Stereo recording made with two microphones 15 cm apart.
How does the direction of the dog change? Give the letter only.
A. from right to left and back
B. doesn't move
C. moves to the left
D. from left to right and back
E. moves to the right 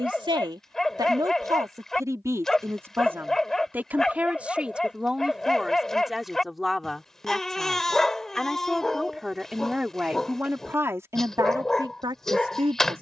B.